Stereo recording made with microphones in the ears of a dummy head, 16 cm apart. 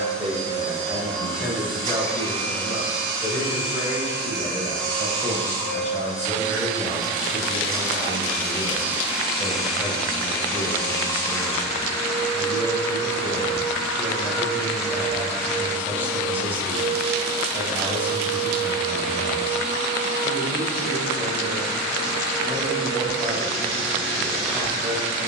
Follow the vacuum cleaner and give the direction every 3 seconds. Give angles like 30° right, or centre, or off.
30° right, 30° right, 30° right, 10° left, 10° left, 20° right, 30° right, 30° right, 30° right.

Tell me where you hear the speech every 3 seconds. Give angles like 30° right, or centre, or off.
centre, 50° left, 30° left, centre, 10° right, 10° right, 10° right, 10° right, 10° right.